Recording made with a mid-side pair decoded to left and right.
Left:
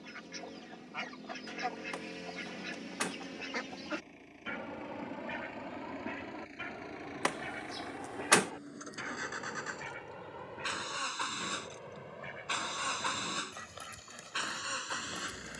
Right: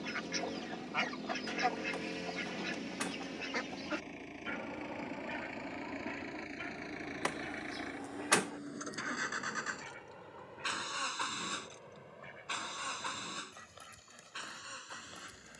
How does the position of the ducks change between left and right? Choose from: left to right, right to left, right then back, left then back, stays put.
right to left.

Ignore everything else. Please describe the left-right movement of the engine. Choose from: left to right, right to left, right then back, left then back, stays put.
right to left.